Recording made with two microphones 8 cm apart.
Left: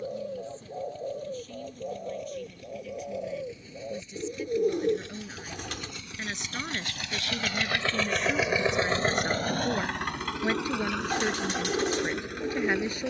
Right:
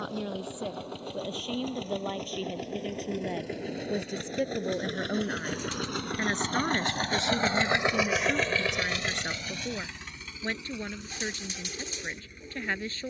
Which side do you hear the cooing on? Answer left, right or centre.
left.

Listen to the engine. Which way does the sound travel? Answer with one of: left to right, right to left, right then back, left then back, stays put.
right to left.